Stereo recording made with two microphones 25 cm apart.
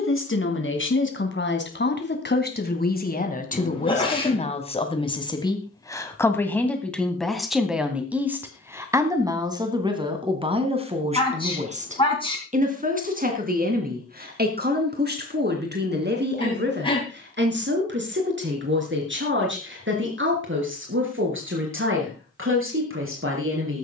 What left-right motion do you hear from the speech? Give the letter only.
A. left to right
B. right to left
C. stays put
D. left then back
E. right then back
A.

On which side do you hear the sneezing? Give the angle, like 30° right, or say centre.
20° left.